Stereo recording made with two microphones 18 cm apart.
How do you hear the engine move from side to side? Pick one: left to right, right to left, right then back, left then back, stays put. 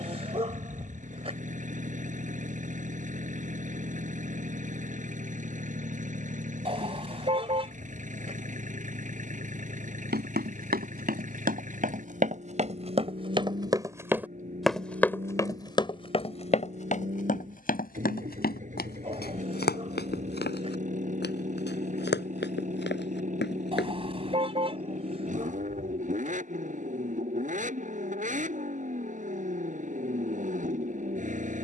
stays put.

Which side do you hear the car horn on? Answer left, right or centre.
right.